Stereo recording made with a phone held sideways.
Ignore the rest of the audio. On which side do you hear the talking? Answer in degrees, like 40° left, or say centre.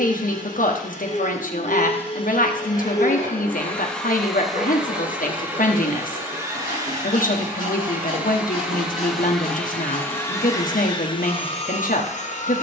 60° left.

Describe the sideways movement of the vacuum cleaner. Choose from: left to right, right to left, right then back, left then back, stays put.
right then back.